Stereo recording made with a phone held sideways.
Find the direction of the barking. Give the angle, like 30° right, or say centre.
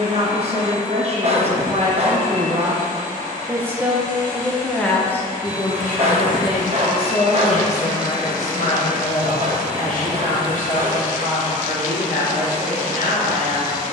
50° right.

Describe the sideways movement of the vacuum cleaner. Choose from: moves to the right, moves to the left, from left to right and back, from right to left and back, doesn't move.
doesn't move.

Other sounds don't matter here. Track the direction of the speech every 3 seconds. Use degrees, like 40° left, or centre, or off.
40° right, centre, 50° left, 60° left, 70° left.